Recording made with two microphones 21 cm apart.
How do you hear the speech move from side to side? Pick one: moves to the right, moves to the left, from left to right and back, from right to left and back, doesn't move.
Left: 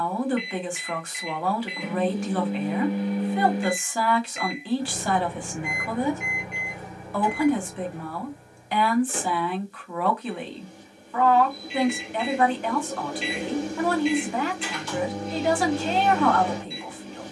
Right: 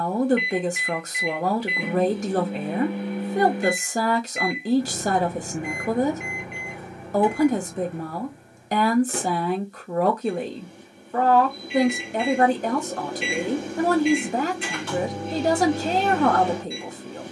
doesn't move.